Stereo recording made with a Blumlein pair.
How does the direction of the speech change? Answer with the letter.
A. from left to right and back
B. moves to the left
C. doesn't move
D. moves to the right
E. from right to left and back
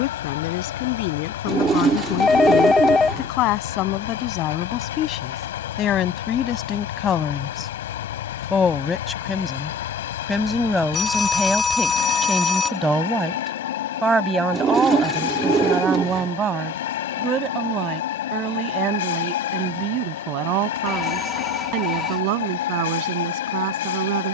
D.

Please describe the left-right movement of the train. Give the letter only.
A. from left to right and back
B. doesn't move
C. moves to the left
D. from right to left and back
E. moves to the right
B.